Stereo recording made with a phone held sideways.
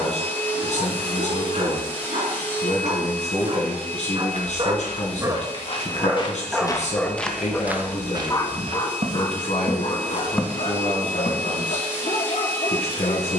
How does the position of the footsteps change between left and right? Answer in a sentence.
In this clip you hear the footsteps go right and come back.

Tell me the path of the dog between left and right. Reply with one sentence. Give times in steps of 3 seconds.
You can hear the dog on the right from 0 s, in the centre from 6 s and on the left from 9 s.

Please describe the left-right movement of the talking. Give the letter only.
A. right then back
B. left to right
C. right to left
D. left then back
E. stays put
E.